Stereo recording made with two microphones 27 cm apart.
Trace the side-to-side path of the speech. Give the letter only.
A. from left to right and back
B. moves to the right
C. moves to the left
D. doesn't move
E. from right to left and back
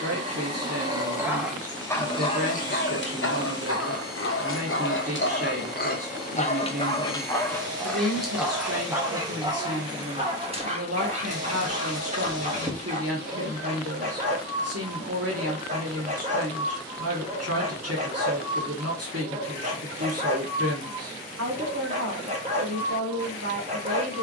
D.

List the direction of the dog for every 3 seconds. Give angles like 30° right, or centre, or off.
centre, 50° left, 10° left, 20° right, 30° right, 30° right, 30° right, 30° right.